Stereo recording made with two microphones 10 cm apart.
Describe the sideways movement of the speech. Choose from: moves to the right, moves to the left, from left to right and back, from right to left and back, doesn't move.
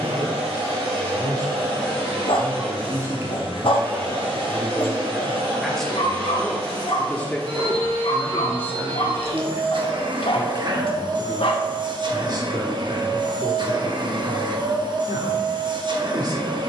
from right to left and back.